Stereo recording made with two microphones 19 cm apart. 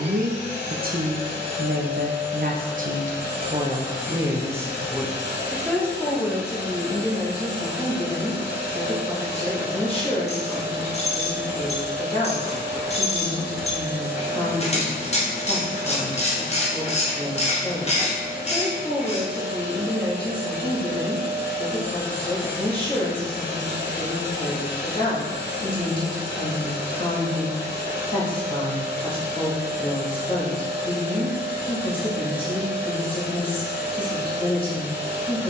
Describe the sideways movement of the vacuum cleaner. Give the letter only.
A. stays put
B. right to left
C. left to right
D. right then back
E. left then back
A.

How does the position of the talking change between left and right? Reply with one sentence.
In this clip you hear the talking move to the left.